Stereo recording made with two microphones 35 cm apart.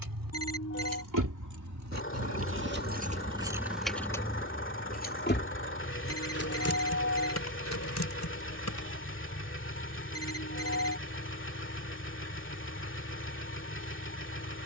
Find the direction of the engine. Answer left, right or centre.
left.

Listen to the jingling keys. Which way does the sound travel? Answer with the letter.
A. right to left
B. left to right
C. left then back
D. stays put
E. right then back
A.